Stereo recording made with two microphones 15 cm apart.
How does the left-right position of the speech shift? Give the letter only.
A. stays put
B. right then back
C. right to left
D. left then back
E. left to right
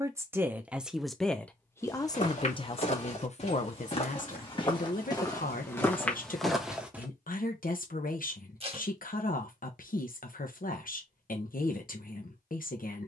C.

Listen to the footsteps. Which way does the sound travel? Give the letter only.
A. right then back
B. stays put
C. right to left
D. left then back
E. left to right
E.